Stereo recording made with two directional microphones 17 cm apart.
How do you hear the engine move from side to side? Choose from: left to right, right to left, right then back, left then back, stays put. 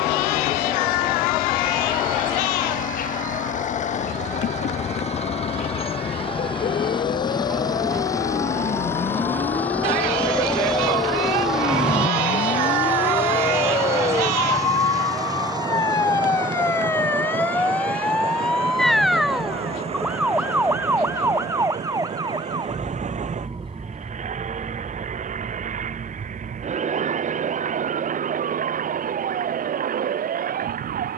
left to right.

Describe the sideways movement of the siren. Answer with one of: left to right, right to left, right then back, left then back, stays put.
left to right.